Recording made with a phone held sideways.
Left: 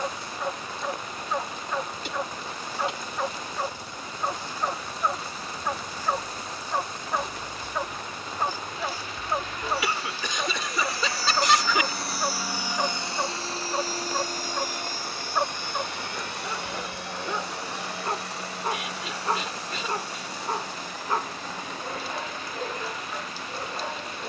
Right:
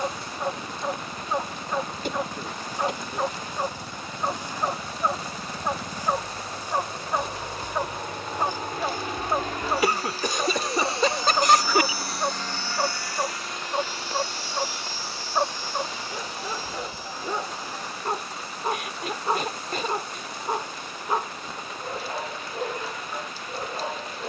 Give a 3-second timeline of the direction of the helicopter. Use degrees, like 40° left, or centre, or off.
80° right, 70° right, 70° right, 30° right, 30° left, 60° left, 70° left, 80° left.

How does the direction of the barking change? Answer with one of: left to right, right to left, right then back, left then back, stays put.
stays put.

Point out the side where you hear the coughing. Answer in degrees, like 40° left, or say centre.
50° right.